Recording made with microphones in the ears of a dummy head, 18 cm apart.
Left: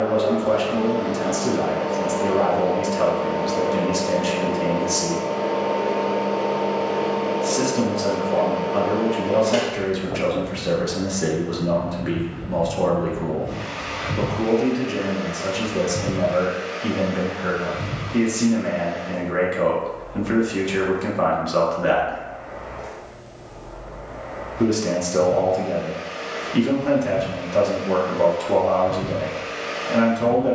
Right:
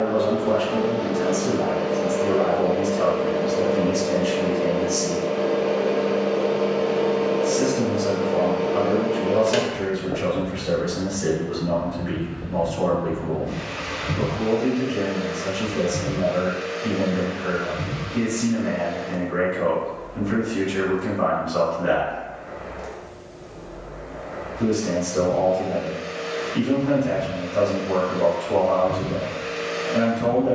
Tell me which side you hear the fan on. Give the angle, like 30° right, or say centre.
20° right.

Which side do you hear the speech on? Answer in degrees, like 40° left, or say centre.
70° left.